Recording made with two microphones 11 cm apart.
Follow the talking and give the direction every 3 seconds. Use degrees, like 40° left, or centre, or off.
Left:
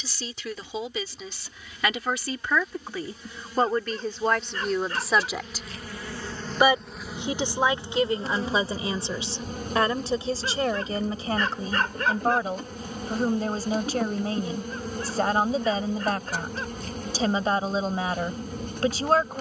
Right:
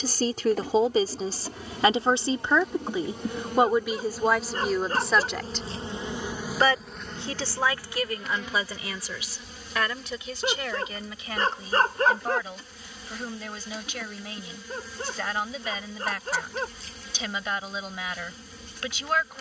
40° right, 10° right, 20° left, 30° left, 40° left, 40° left, 40° left.